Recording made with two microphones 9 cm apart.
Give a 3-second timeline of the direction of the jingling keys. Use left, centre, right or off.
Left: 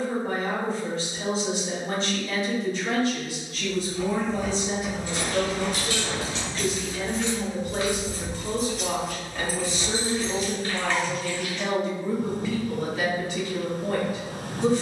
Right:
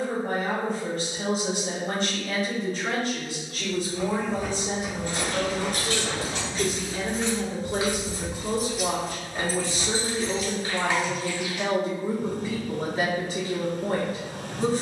off, right, right, left, off.